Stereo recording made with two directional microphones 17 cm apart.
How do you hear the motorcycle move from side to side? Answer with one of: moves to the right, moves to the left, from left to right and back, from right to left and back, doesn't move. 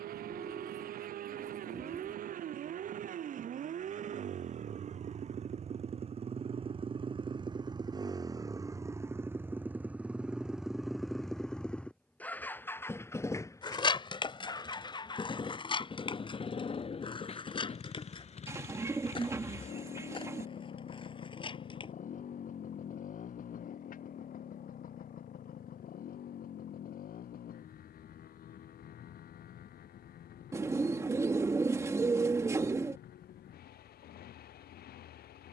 moves to the left.